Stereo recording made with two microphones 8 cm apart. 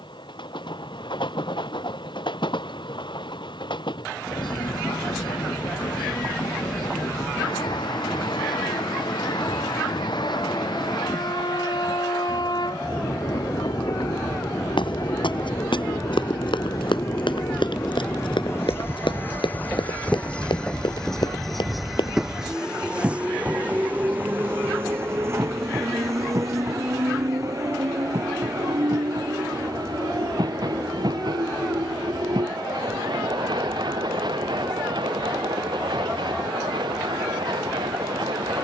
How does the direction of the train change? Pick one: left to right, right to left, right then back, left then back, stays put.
left to right.